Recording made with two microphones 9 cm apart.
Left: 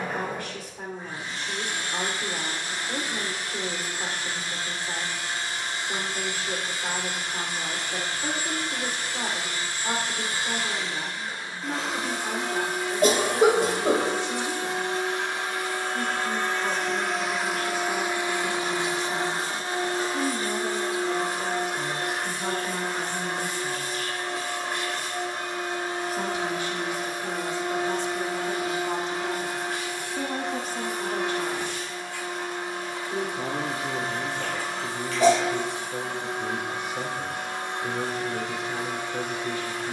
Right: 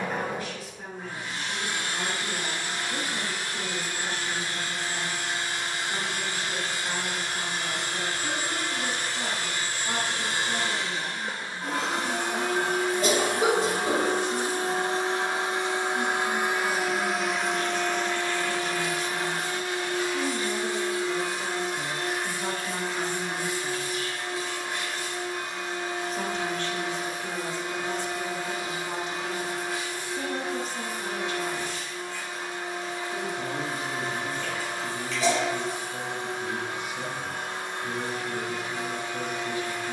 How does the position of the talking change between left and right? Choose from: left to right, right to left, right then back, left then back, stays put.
right then back.